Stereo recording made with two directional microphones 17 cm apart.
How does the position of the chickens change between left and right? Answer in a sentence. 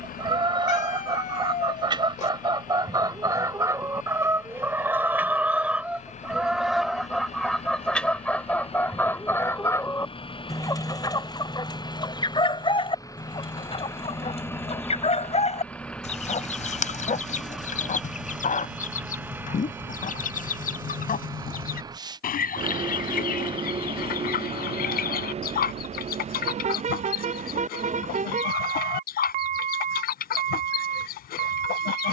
You can hear the chickens go from the right side to the left.